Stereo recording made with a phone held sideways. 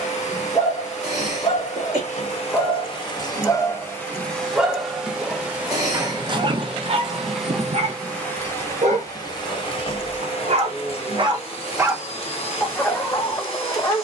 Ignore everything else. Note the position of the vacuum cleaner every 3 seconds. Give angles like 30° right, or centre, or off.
50° left, 10° left, 10° left, 40° left, 50° left.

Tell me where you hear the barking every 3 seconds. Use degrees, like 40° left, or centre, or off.
30° left, 10° right, 50° right, 50° right, 20° left.